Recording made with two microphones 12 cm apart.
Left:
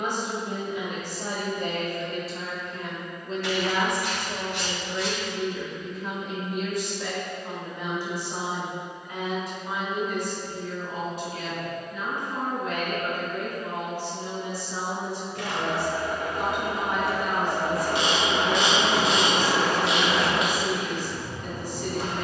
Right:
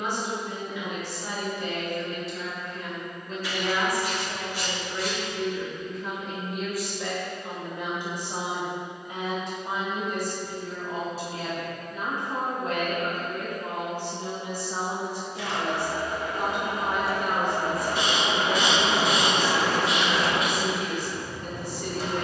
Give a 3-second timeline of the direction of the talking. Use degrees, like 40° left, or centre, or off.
50° left, 20° left, 10° right, 30° right, 40° right, 50° right, 50° right, 50° right.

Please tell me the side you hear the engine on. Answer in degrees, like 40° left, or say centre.
50° left.